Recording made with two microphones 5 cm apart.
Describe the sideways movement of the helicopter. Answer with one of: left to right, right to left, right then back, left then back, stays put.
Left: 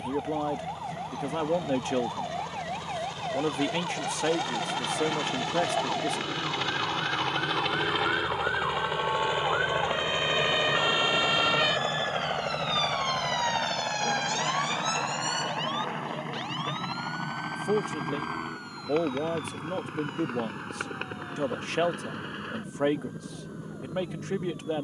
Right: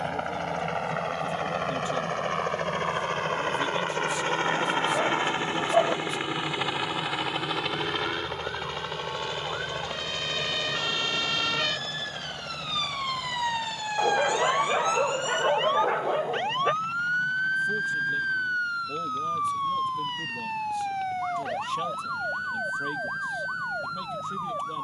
right to left.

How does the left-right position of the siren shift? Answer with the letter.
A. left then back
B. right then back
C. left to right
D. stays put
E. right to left
C.